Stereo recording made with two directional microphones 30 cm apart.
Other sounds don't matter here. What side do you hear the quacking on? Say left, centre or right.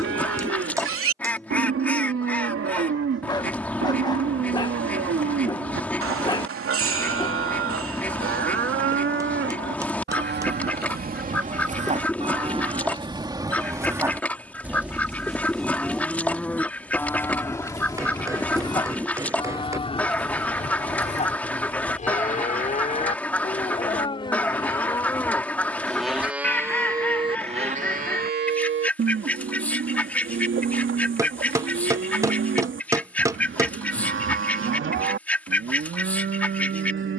centre.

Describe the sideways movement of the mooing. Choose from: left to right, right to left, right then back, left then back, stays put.
left then back.